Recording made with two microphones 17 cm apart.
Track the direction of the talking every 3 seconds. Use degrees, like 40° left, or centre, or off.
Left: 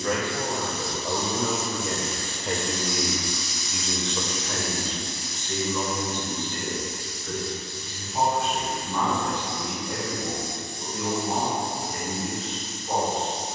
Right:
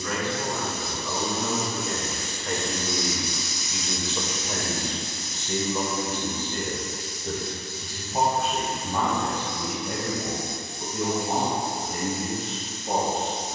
30° left, 10° right, 40° right, 50° right, 60° right.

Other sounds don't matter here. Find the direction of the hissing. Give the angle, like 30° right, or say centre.
20° right.